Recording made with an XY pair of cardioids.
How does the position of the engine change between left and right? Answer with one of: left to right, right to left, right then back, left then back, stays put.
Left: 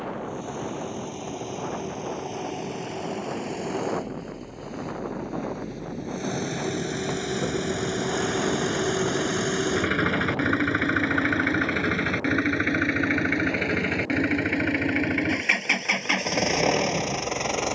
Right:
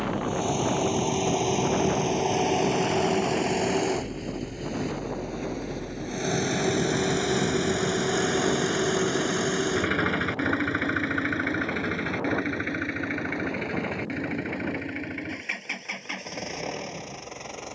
right to left.